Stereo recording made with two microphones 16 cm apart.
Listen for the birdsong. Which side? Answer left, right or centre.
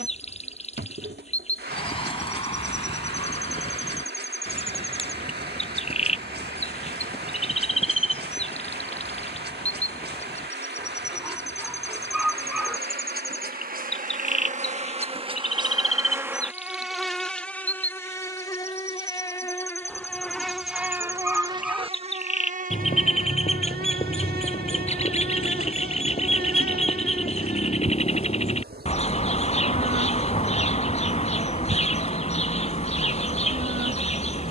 left.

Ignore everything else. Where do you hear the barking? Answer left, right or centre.
centre.